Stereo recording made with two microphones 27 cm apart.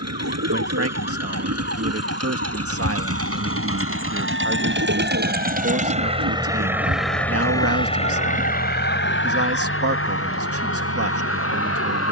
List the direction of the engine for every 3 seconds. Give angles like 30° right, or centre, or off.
70° right, 50° right, 10° left, 60° left.